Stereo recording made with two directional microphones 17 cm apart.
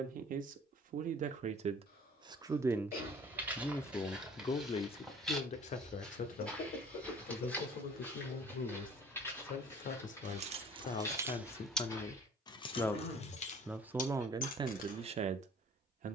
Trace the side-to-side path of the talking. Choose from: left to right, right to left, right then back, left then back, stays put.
left then back.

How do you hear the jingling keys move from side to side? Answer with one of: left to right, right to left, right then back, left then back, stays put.
right to left.